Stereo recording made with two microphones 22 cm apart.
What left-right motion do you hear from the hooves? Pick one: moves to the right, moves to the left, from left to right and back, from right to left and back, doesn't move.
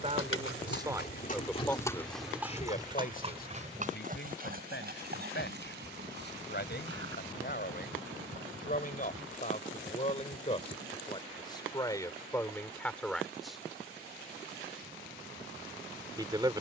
moves to the right.